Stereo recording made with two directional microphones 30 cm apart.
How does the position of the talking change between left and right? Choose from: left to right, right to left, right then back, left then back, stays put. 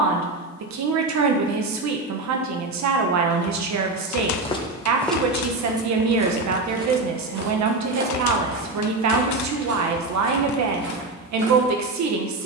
stays put.